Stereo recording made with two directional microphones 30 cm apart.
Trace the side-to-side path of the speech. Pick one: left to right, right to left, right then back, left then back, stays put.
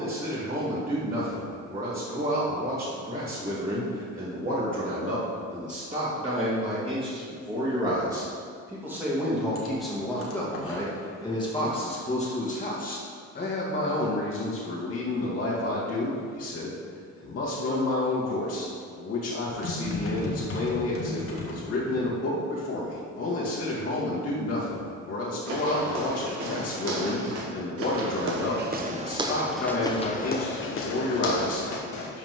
right to left.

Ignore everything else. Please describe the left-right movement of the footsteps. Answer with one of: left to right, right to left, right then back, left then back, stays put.
right to left.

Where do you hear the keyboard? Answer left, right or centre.
left.